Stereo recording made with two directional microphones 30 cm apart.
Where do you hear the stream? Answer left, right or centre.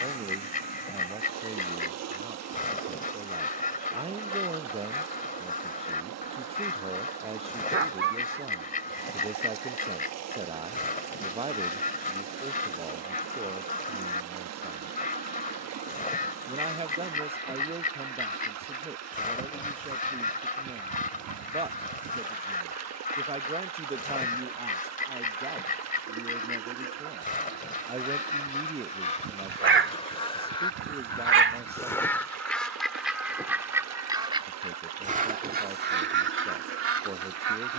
right.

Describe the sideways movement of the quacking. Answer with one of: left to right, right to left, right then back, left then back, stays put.
left to right.